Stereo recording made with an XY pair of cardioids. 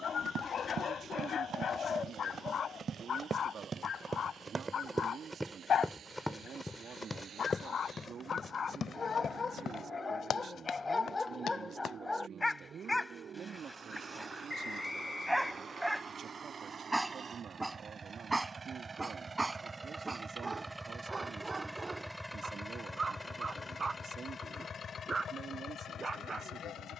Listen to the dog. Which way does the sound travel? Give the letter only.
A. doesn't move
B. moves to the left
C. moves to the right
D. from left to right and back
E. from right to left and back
C.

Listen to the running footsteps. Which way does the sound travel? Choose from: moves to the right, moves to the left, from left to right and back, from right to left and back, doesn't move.
moves to the left.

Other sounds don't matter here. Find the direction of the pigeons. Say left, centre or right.
left.